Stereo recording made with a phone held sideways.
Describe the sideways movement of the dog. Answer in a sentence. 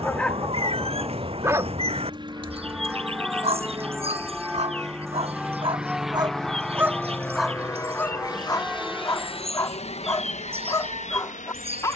You can hear the dog go right and come back.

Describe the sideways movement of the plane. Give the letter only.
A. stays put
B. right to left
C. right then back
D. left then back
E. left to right
B.